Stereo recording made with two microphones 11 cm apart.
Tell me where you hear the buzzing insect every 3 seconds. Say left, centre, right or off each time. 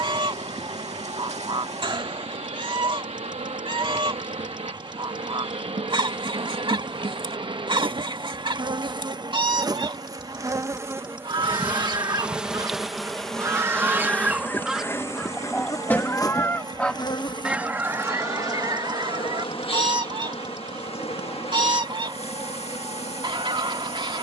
right, right, right, right, centre, left, left, left.